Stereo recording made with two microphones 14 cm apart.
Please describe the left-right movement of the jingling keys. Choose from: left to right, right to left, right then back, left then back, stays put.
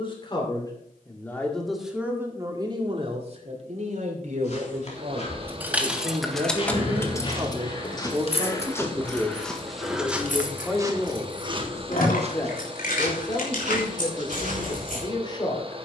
right to left.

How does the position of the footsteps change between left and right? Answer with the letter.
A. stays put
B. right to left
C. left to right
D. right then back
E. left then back
C.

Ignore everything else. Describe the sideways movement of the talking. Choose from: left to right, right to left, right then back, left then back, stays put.
right then back.